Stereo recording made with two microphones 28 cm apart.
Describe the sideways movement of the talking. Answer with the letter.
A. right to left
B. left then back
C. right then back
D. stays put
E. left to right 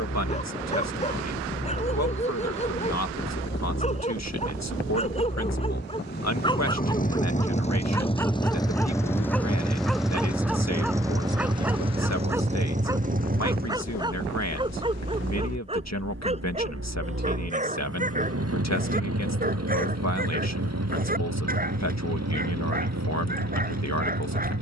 D.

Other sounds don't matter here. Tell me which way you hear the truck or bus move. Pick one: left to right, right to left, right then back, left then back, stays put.
left to right.